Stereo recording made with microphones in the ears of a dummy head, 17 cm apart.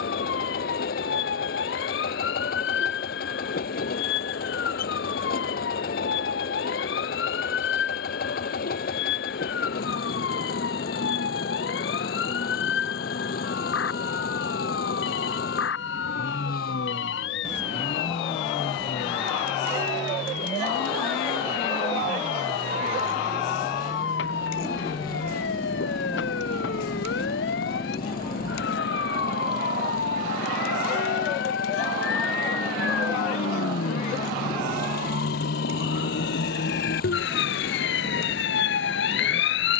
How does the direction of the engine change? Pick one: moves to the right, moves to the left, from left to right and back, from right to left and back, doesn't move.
doesn't move.